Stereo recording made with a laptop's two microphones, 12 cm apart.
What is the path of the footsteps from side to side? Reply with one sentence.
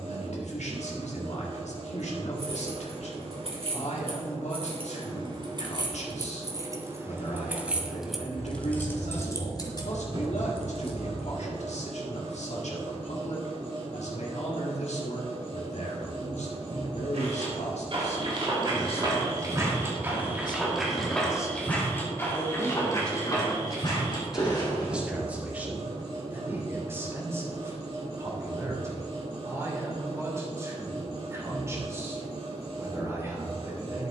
In this clip you hear the footsteps travel towards the left.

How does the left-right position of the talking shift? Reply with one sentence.
In this clip you hear the talking travel towards the right.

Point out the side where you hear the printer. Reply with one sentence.
You can hear the printer on the right.